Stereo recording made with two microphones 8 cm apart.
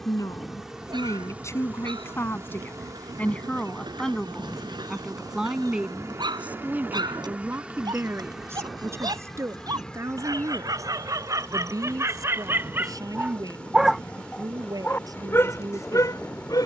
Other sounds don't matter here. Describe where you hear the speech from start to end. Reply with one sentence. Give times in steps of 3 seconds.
You can hear the speech on the left from 0 s, in the centre from 3 s and on the right from 6 s.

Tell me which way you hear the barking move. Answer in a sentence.
You can hear the barking move to the left.